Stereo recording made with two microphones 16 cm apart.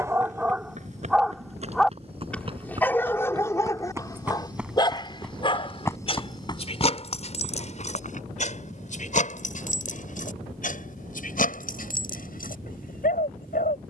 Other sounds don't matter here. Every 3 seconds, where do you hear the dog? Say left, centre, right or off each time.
centre, left, left, left, left.